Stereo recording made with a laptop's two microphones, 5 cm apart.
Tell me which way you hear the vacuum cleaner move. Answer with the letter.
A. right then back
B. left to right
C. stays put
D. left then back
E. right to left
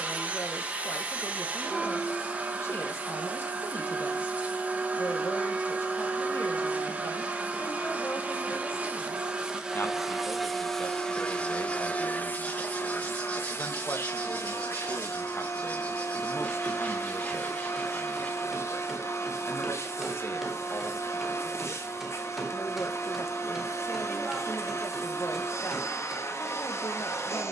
E.